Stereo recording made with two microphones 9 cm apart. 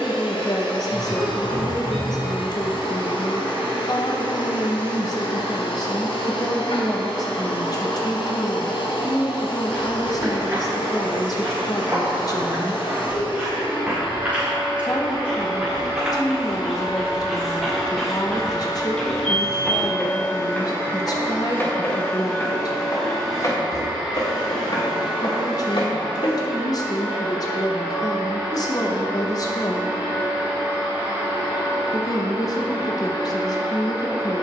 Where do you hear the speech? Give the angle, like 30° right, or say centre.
40° left.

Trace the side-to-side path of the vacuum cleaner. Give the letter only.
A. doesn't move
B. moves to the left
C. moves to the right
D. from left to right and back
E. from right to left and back
C.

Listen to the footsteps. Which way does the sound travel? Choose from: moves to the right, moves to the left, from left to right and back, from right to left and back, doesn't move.
moves to the left.